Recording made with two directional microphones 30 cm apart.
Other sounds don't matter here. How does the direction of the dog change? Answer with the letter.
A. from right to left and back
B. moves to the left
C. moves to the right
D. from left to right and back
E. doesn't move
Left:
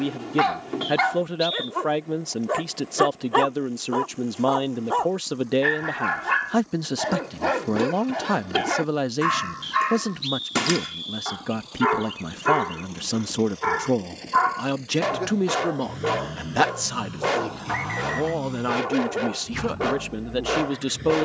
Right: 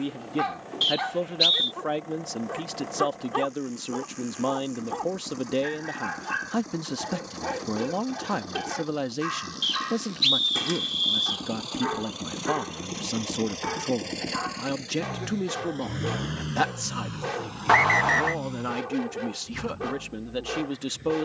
E.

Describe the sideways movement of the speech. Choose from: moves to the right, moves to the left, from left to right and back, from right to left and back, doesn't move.
doesn't move.